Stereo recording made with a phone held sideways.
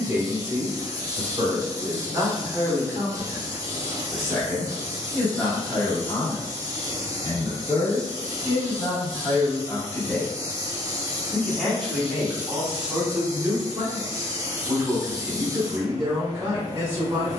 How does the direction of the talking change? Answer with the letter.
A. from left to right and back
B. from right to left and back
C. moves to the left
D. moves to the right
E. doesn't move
B.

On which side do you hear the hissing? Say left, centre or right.
right.